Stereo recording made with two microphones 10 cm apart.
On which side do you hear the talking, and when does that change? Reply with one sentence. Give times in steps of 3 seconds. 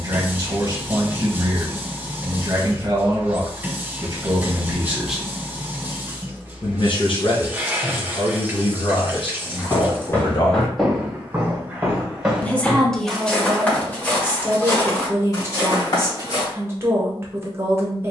In this clip you hear the talking on the right from 0 s, on the left from 6 s, in the centre from 12 s and on the right from 15 s.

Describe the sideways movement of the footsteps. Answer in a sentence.
You can hear the footsteps go right and come back.